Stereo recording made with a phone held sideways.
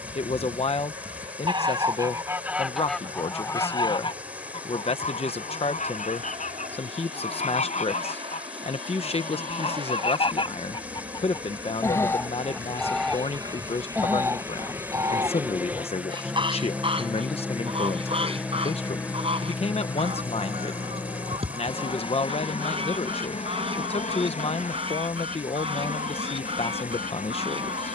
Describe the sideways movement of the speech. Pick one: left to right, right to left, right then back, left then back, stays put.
stays put.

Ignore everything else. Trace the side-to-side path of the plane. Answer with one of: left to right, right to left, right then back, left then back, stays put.
right to left.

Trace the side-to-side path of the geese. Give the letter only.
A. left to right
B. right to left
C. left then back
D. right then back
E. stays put
C.